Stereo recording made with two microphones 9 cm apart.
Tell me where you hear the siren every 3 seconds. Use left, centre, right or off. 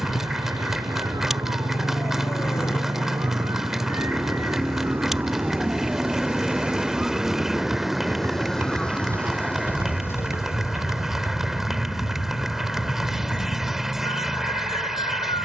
right, right, centre, left, left.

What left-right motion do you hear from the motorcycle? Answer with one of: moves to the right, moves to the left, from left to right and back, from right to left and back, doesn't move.
moves to the right.